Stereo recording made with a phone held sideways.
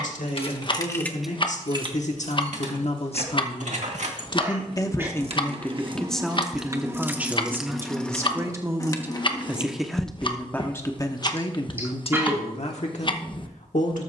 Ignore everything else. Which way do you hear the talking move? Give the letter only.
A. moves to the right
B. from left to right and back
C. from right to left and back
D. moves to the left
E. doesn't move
B.